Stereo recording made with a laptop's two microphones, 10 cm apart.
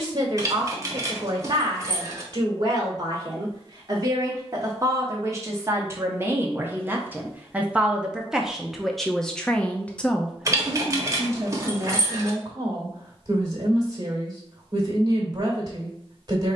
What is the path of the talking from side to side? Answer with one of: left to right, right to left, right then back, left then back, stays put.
left then back.